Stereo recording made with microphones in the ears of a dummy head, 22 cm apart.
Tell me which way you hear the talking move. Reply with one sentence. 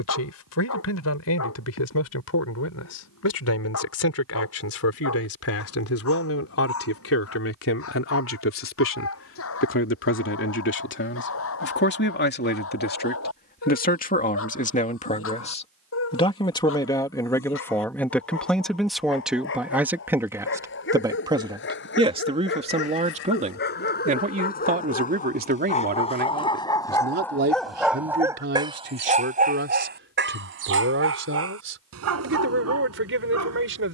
In this clip you hear the talking move to the right.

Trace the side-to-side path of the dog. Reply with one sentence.
You can hear the dog go from the left side to the right.